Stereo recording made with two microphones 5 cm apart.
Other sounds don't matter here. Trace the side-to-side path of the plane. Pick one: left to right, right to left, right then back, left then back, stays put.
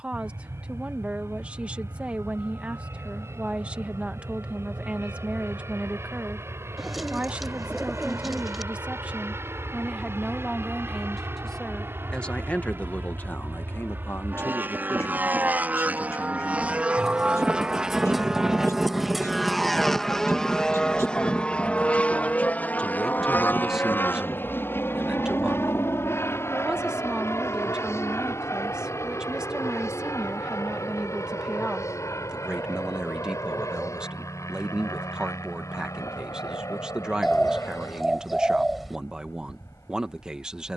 right to left.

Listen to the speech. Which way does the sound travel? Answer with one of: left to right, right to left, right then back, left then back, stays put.
left then back.